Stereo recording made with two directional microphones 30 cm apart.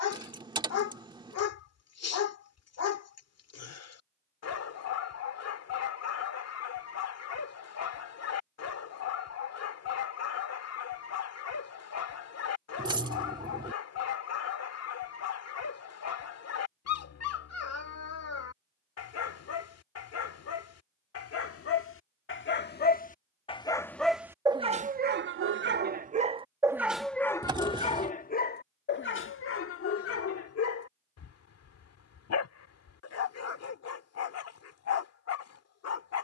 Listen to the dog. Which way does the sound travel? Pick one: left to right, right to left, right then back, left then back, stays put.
right then back.